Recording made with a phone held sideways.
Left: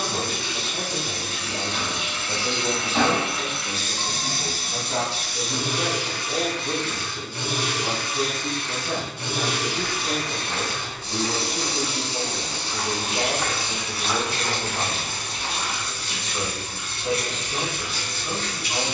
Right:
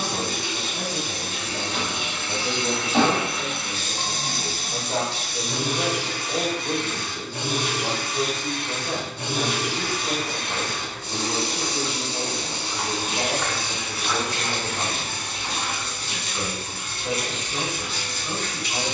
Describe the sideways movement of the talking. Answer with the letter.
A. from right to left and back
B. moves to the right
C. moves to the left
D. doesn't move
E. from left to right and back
E.